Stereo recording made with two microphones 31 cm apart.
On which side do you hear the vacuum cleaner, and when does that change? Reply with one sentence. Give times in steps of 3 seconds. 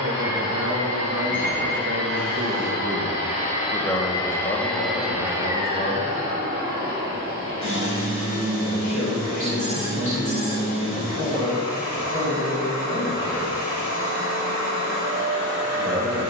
You can hear the vacuum cleaner on the left from 0 s, in the centre from 3 s and on the right from 6 s.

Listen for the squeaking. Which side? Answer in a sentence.
In this clip you hear the squeaking on the right.